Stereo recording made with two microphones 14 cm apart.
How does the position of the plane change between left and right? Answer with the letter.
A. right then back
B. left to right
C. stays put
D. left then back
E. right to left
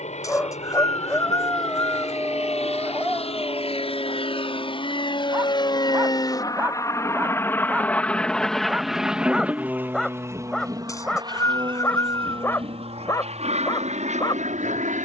B.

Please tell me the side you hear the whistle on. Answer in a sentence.
You can hear the whistle on the left.